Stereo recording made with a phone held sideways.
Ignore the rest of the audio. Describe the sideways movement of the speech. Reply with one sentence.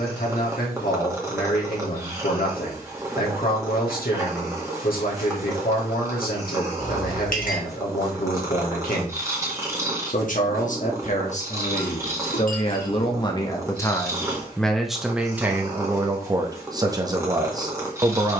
In this clip you hear the speech travel towards the right.